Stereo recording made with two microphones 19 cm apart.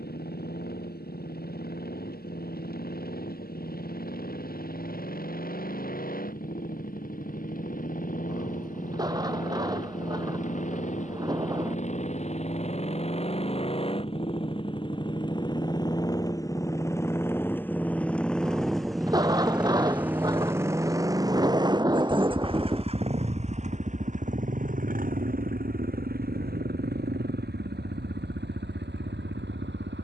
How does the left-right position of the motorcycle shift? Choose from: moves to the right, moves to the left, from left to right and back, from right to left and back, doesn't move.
moves to the right.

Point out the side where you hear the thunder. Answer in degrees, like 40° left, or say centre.
20° right.